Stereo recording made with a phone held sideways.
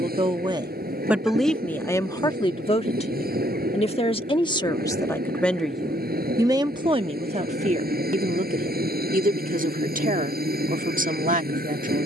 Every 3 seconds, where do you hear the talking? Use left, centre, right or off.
centre, left, right, right.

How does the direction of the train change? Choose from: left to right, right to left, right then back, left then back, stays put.
stays put.